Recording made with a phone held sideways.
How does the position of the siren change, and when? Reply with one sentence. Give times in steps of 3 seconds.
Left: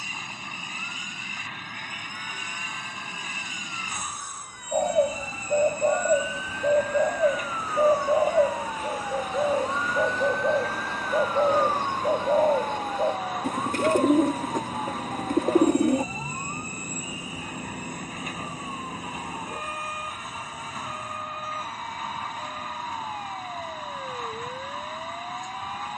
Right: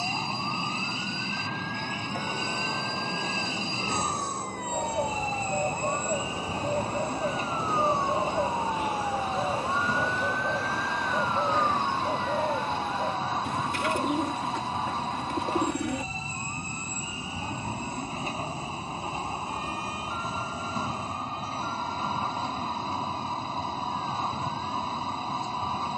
You can hear the siren on the right from 0 s, in the centre from 9 s and on the left from 12 s.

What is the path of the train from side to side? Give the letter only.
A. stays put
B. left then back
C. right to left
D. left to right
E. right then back
A.